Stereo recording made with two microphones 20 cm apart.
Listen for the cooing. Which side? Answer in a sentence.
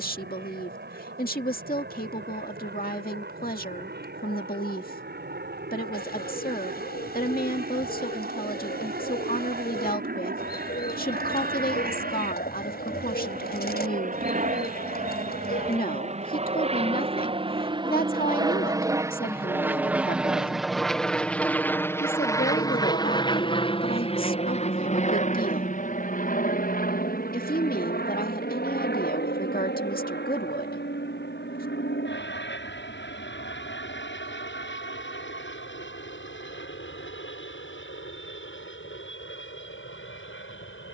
You can hear the cooing on the left.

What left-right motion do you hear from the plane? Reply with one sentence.
In this clip you hear the plane go from the right side to the left.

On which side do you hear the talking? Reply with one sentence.
You can hear the talking on the left.